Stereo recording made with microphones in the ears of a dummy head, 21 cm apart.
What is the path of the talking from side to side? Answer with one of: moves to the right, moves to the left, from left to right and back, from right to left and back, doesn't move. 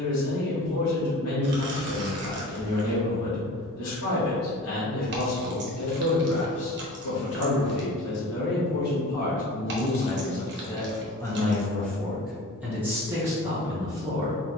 moves to the right.